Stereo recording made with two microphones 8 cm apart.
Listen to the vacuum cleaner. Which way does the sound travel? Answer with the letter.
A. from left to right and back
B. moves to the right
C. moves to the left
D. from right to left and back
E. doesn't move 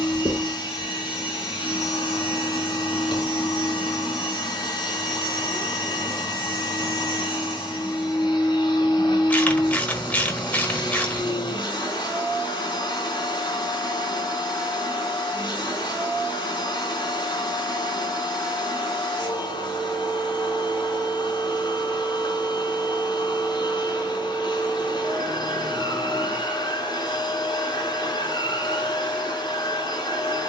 E.